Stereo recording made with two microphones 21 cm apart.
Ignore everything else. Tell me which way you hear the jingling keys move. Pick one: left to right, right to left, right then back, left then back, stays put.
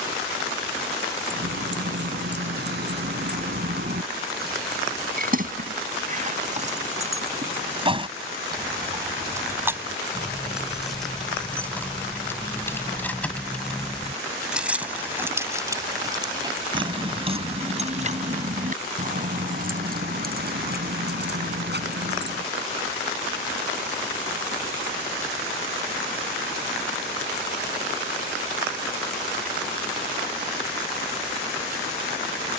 left then back.